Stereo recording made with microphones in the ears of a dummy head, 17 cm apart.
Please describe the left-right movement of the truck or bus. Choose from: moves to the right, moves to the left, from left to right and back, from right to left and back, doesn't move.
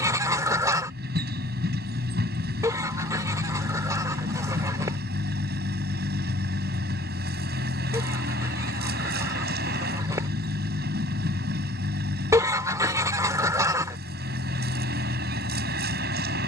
doesn't move.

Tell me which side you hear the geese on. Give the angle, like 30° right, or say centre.
20° right.